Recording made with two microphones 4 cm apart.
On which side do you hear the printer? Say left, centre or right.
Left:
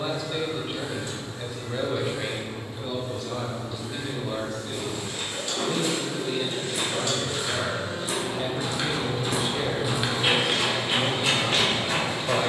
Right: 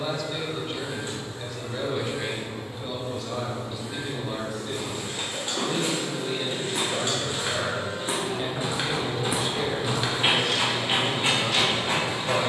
right.